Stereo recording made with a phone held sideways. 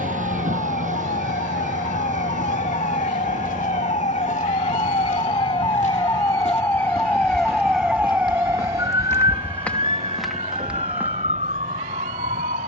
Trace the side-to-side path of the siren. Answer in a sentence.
In this clip you hear the siren go from the left side to the right.